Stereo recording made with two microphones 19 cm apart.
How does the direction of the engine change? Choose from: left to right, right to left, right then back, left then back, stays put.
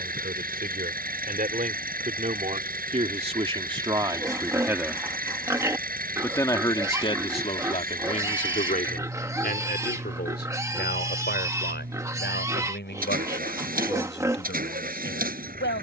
stays put.